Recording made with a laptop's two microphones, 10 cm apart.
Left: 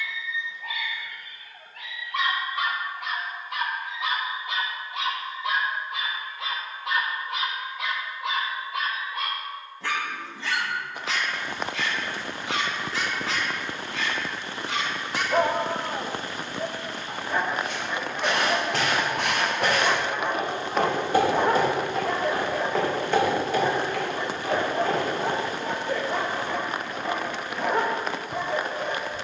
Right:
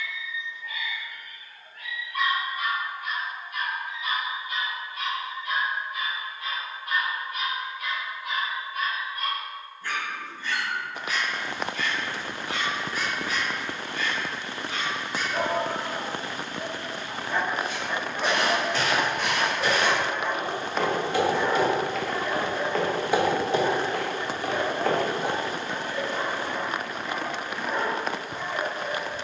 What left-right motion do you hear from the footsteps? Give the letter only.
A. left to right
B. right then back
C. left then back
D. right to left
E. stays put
A.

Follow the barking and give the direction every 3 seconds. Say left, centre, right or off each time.
left, left, left, left, left, left, centre, left, left, left.